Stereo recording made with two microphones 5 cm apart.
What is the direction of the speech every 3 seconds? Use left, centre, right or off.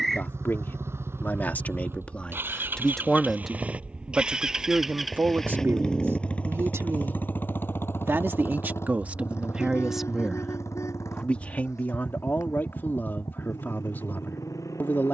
left, right, right, centre, left.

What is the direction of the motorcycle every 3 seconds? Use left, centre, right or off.
right, centre, left, left, left.